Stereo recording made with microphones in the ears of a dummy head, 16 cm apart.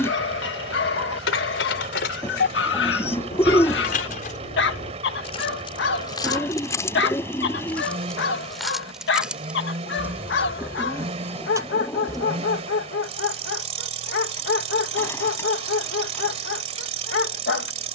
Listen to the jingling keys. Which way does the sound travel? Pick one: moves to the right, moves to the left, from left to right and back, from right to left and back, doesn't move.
moves to the right.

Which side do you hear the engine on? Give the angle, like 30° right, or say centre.
40° right.